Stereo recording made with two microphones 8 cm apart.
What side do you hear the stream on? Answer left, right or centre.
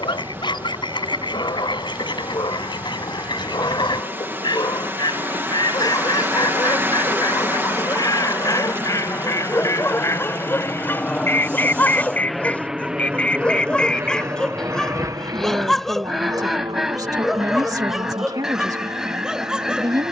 right.